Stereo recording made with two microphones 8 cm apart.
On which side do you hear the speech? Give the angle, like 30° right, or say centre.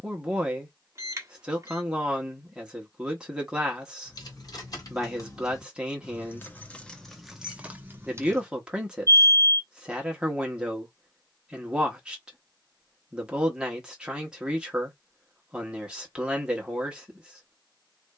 10° right.